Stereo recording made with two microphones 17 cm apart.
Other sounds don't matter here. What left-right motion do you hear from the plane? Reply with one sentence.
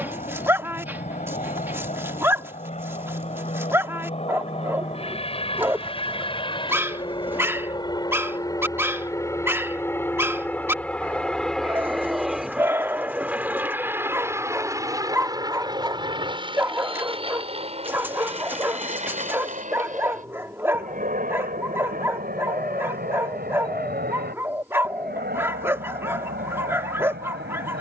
In this clip you hear the plane move from left to right.